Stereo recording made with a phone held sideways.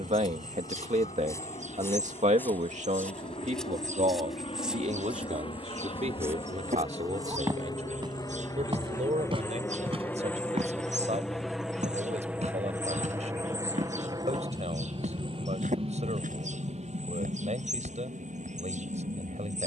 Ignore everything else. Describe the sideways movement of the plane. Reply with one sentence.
In this clip you hear the plane go from the left side to the right.